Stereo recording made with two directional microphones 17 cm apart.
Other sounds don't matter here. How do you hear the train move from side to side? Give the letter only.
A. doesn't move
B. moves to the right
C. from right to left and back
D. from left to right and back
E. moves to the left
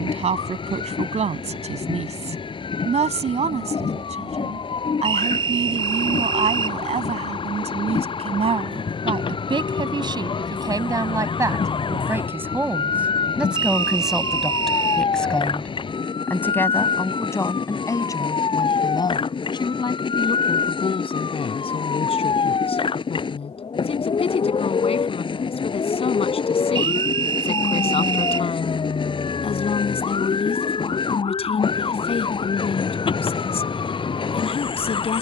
A.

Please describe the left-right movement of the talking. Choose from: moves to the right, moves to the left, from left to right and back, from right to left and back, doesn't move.
moves to the left.